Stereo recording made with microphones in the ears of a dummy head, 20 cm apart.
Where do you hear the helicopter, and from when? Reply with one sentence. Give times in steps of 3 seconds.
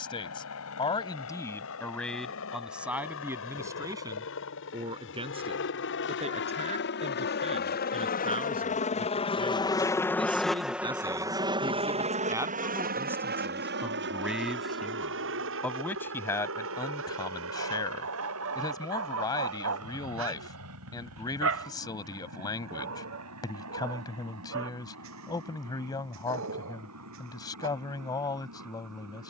In this clip you hear the helicopter on the left from 0 s, in the centre from 9 s and on the right from 12 s.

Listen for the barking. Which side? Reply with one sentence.
In this clip you hear the barking on the right.